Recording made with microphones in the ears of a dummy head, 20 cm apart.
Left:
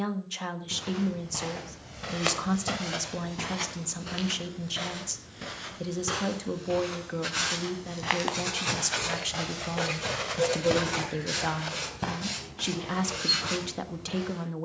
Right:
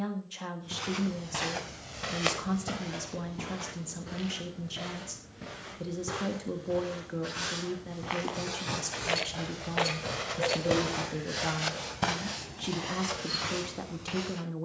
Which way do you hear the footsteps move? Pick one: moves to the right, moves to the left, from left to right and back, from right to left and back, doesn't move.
from right to left and back.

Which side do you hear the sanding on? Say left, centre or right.
left.